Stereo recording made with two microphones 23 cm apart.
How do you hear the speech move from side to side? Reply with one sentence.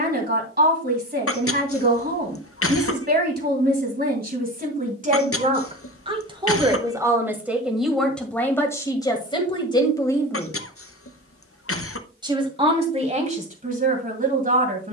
In this clip you hear the speech go left and come back.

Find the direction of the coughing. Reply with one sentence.
You can hear the coughing on the left.